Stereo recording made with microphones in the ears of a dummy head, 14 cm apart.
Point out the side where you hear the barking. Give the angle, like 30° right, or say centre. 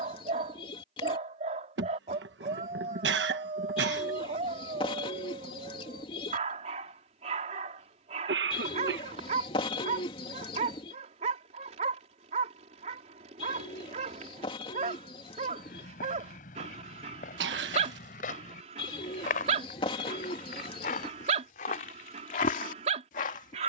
40° right.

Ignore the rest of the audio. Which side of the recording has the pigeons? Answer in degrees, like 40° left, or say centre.
40° left.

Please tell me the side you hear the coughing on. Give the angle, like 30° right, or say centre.
80° right.